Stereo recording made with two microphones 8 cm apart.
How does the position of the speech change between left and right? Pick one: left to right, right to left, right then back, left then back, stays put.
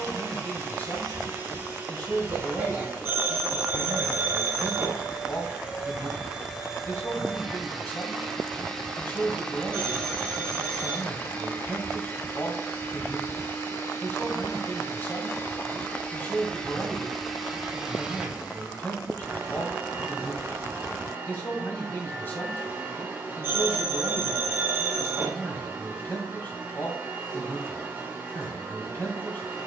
stays put.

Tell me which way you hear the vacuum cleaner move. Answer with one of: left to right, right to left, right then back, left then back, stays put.
left then back.